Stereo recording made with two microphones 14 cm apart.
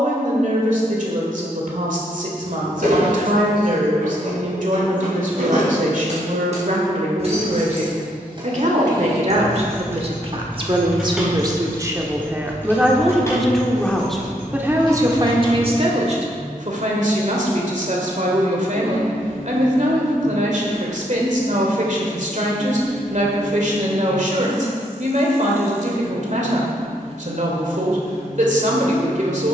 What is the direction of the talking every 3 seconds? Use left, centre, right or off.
right, right, right, right, centre, right, right, right, right, right.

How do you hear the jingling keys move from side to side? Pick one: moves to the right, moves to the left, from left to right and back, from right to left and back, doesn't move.
moves to the left.